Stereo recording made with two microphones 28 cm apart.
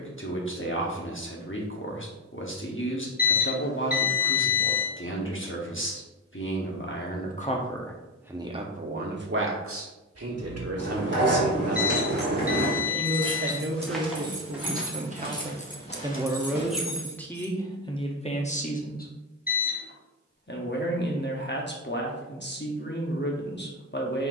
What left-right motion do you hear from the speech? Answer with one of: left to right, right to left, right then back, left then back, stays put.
right then back.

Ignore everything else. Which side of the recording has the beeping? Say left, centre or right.
left.